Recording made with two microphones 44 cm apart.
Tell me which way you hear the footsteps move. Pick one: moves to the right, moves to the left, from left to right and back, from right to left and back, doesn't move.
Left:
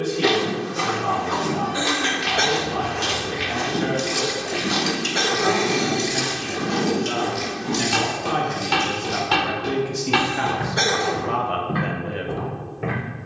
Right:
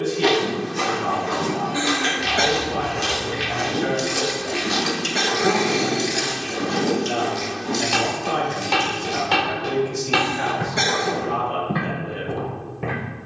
from right to left and back.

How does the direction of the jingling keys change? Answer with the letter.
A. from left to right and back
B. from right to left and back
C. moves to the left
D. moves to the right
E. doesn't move
C.